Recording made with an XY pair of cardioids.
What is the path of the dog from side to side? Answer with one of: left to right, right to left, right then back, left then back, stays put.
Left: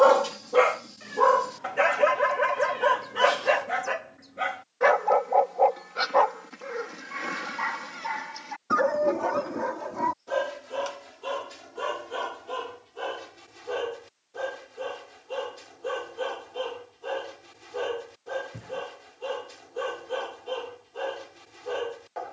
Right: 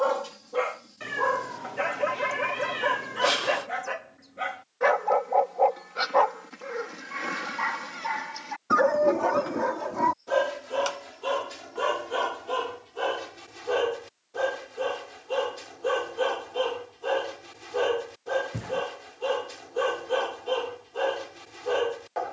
left to right.